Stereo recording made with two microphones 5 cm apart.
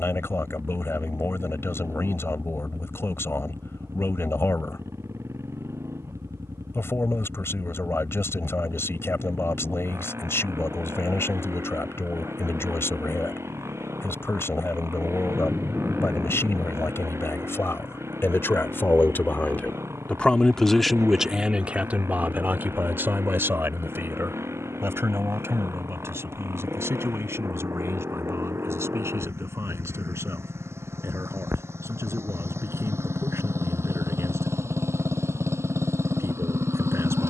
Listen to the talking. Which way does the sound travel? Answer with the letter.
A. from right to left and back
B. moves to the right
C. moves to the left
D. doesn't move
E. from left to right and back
B.